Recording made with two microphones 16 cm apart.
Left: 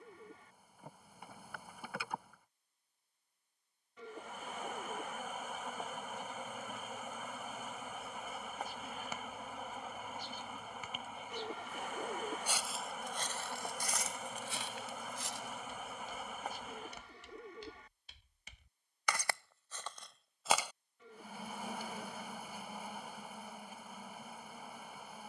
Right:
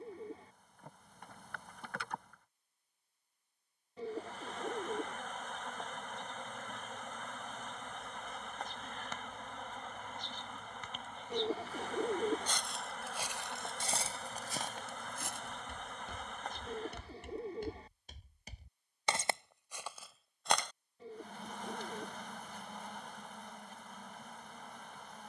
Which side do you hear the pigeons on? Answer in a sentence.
You can hear the pigeons on the right.